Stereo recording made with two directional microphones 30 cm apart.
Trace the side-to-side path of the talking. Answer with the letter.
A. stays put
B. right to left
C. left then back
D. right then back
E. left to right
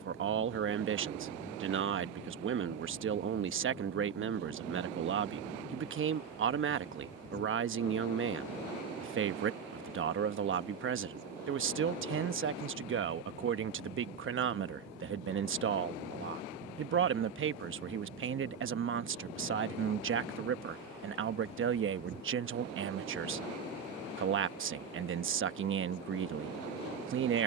A.